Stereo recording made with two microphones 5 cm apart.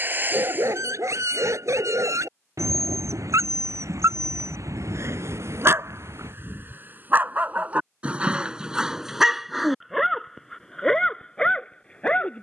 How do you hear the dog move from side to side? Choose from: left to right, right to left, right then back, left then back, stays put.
right to left.